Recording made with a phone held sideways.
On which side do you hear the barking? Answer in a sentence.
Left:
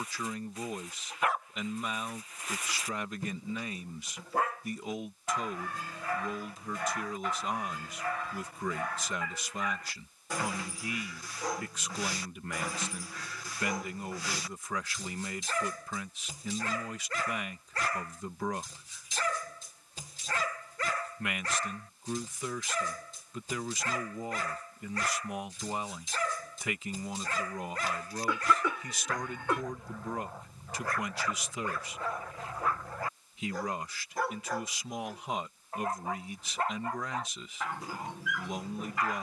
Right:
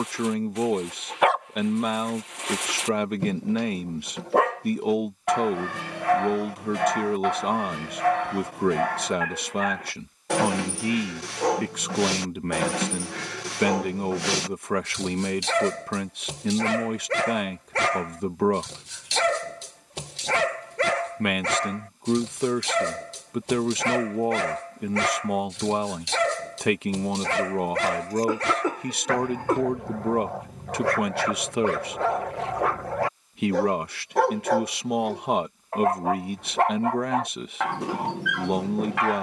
You can hear the barking on the right.